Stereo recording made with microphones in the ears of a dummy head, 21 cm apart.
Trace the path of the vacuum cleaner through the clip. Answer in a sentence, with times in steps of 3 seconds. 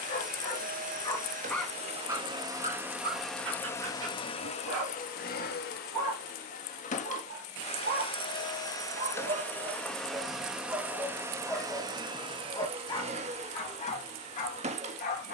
In this clip you hear the vacuum cleaner on the right from 0 s, on the left from 3 s, in the centre from 9 s and on the right from 12 s.